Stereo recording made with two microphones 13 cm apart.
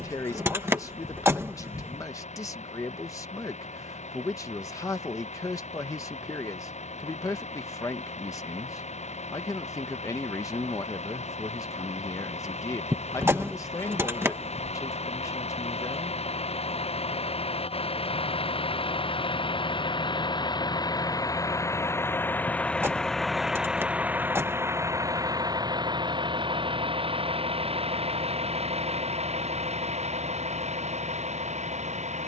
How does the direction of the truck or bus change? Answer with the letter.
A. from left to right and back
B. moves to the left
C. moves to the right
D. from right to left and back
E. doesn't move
C.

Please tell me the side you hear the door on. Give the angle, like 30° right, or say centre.
20° right.